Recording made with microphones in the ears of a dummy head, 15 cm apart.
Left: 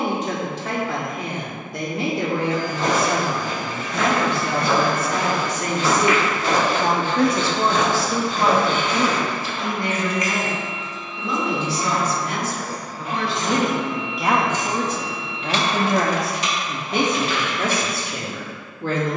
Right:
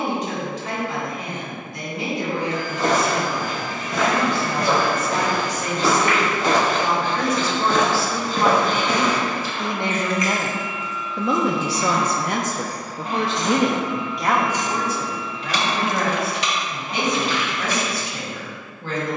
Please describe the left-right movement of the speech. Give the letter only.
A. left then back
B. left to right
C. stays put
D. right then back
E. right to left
D.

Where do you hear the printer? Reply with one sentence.
You can hear the printer on the right.